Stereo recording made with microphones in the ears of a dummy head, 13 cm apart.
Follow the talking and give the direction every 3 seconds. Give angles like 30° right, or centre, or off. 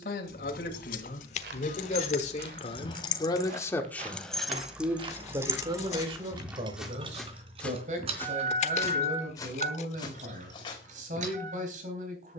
60° left, centre, 50° right, 60° right.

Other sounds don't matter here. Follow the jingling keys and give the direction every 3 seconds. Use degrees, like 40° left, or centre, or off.
50° left, centre, 40° right, 50° right.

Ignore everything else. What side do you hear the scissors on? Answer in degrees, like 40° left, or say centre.
50° left.